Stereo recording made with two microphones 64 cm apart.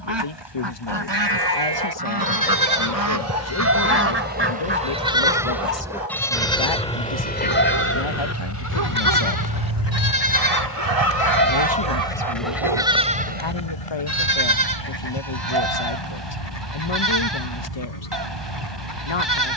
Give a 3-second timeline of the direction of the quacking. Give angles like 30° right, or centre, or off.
40° right, 20° right, 10° left, 40° left, 60° left, 70° left, 80° left.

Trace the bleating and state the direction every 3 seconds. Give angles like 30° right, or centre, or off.
40° right, 10° right, 20° left, 30° left, 10° right, 40° right, 40° right.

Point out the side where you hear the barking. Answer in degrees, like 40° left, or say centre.
60° right.